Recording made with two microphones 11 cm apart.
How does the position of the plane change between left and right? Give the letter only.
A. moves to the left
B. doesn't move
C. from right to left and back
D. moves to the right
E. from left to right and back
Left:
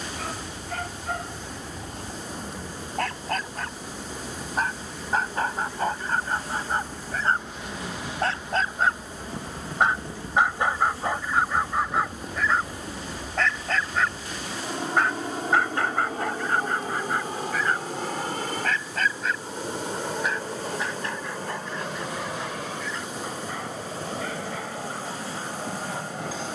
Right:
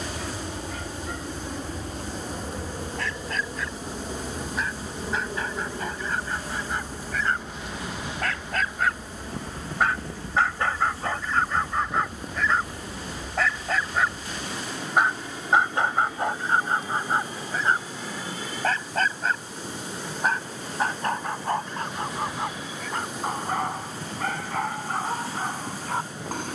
A.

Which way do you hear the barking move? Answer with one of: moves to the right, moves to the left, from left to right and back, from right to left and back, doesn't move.
moves to the right.